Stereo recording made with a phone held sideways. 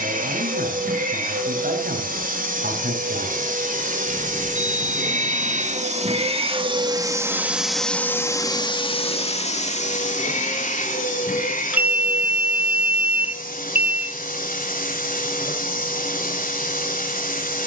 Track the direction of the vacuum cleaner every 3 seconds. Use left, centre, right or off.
right, right, centre, left, left, left.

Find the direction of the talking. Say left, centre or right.
right.